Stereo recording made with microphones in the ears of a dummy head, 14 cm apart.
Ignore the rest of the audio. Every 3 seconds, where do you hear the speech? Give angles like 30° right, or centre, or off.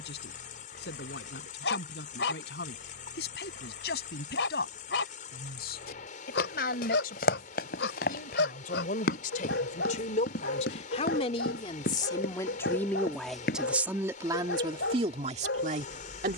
70° left, 70° left, 60° left, 40° left, centre, 50° right.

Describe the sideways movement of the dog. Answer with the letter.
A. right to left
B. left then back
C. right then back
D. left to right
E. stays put
E.